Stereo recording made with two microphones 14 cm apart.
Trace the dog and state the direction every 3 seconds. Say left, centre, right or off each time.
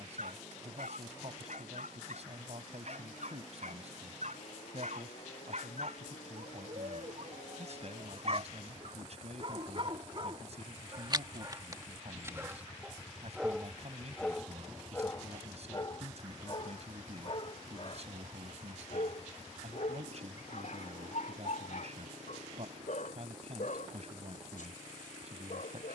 right, right, right, right, centre, left, left, left, left.